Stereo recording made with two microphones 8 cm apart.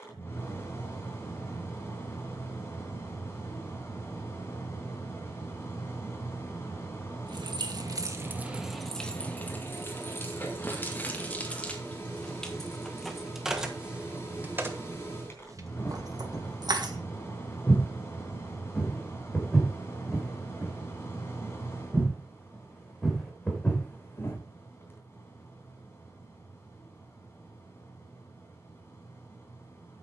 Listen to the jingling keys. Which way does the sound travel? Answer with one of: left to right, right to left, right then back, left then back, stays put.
left then back.